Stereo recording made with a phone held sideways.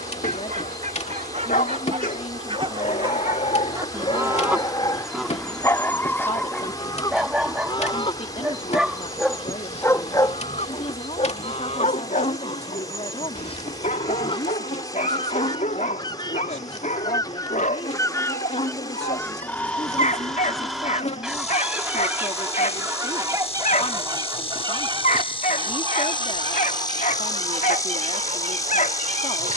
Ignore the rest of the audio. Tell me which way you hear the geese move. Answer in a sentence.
You can hear the geese move from right to left and back again.